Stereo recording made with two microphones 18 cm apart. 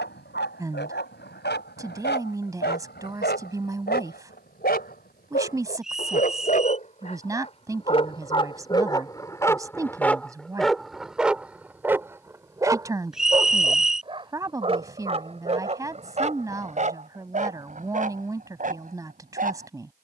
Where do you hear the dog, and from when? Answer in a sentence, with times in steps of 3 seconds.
You can hear the dog on the left from 0 s, in the centre from 9 s and on the right from 12 s.